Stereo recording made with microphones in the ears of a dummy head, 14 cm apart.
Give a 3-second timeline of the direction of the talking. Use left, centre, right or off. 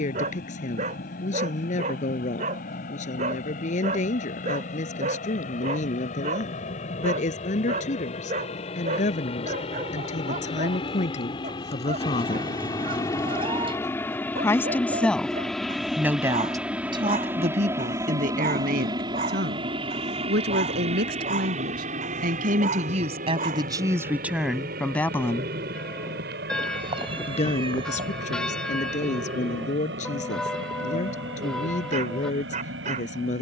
left, left, left, left, left, right, right, right, centre, left, left.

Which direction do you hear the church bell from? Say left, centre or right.
centre.